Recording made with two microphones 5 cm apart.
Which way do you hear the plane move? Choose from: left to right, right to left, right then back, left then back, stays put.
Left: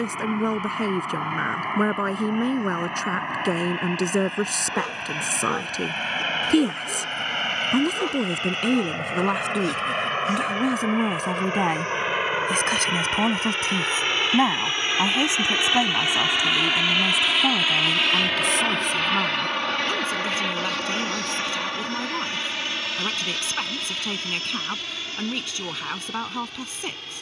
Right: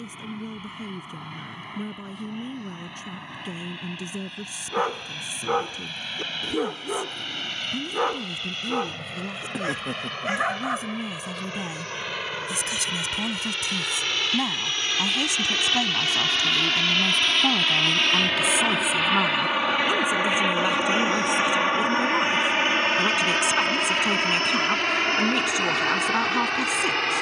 left to right.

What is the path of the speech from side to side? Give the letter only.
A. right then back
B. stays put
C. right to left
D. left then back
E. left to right
E.